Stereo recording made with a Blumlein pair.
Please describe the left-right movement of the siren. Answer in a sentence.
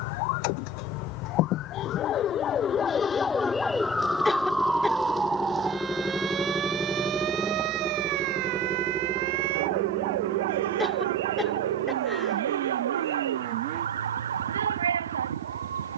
In this clip you hear the siren move from left to right.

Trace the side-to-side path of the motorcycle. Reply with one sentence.
In this clip you hear the motorcycle move to the right.